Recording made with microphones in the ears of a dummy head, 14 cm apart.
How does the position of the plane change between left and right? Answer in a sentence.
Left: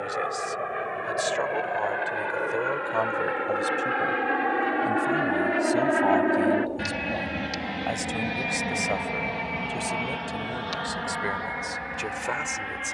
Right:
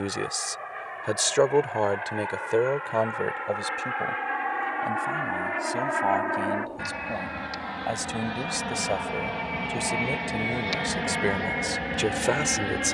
In this clip you hear the plane move to the right.